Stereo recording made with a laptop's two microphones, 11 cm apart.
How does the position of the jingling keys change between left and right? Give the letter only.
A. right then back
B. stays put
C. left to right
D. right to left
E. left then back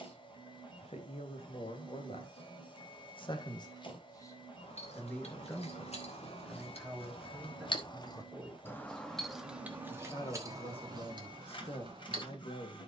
C.